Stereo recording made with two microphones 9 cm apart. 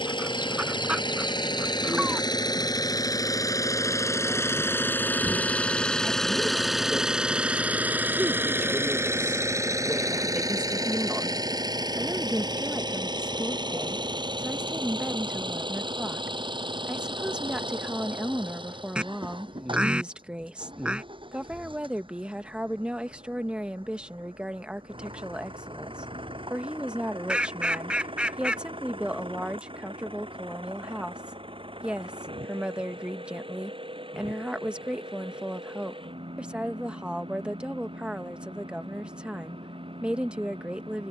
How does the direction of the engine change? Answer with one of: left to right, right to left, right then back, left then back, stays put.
left to right.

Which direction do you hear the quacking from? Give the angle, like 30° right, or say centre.
10° right.